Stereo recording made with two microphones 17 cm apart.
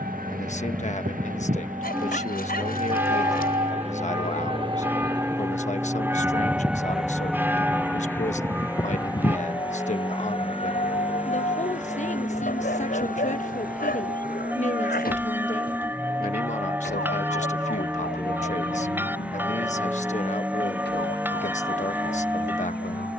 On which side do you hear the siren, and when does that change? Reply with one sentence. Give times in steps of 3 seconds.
In this clip you hear the siren on the right from 0 s, in the centre from 6 s and on the left from 9 s.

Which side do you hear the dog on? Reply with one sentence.
In this clip you hear the dog on the left.